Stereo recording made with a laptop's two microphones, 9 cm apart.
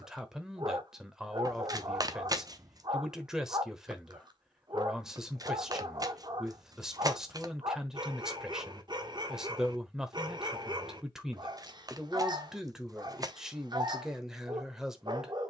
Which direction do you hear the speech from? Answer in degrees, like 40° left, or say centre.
10° right.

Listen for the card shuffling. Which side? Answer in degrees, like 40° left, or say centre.
40° right.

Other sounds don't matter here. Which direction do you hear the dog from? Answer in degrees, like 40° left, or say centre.
50° right.